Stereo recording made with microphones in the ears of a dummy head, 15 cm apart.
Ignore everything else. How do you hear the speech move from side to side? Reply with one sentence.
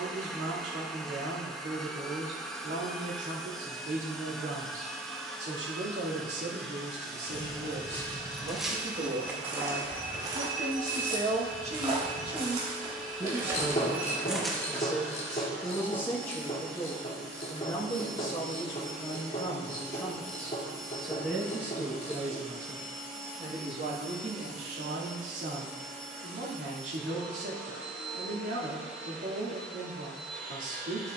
In this clip you hear the speech move from right to left and back again.